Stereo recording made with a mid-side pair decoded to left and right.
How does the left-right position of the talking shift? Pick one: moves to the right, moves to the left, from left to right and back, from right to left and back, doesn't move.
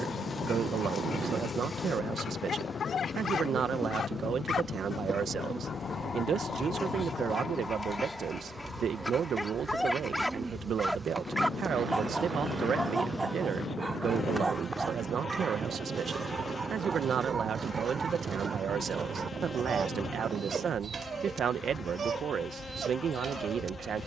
doesn't move.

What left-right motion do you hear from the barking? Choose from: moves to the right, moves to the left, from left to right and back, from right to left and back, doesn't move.
moves to the right.